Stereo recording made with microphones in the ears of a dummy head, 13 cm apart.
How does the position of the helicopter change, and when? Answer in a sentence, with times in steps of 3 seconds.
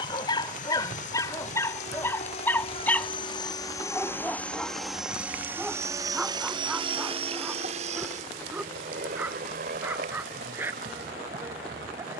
In this clip you hear the helicopter on the left from 0 s, in the centre from 3 s and on the right from 6 s.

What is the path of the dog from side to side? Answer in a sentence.
You can hear the dog travel towards the right.